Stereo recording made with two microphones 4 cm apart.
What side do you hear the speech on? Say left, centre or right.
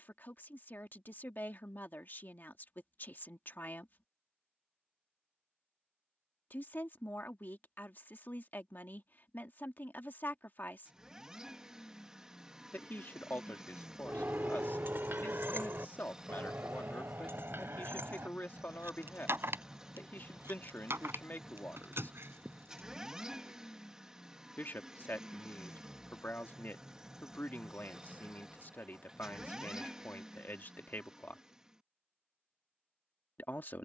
left.